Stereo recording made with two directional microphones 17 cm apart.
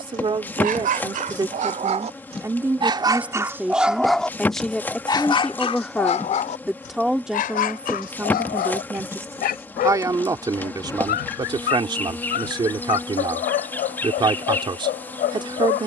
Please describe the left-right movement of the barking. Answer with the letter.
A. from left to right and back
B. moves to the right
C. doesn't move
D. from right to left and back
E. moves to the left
E.